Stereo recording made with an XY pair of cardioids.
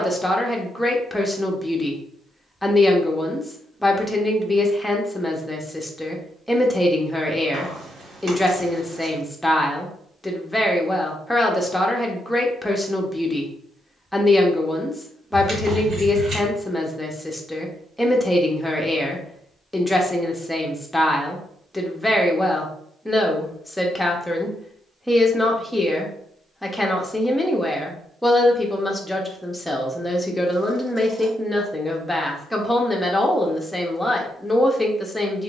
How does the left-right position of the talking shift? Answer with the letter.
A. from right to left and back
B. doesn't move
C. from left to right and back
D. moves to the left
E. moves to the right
B.